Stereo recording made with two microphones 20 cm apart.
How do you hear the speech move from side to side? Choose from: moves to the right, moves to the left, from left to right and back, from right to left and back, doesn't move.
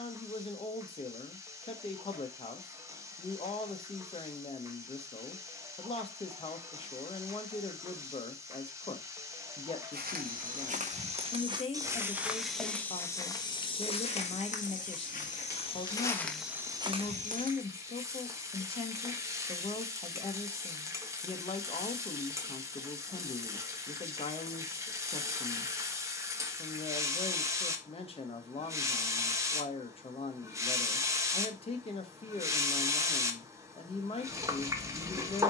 doesn't move.